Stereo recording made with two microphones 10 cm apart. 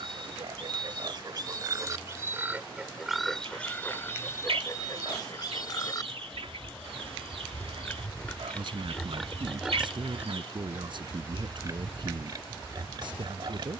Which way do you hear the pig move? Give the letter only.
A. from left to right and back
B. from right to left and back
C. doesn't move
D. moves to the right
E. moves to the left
B.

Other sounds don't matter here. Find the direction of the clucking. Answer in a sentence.
You can hear the clucking on the right.